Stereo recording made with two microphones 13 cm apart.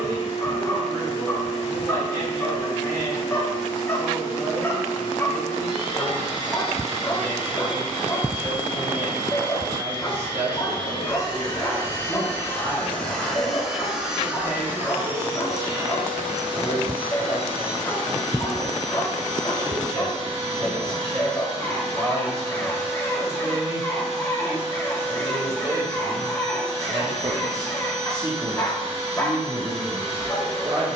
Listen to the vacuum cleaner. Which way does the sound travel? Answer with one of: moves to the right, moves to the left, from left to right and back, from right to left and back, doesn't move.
moves to the right.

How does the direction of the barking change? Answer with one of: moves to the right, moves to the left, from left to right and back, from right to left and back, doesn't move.
doesn't move.